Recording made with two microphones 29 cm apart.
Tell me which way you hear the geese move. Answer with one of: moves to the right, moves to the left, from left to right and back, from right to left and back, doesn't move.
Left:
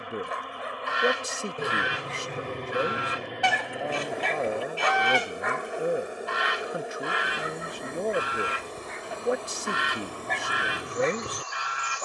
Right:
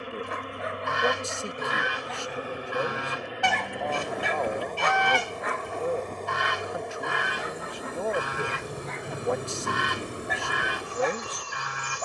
doesn't move.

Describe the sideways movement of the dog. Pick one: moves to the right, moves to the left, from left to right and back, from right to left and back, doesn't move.
from left to right and back.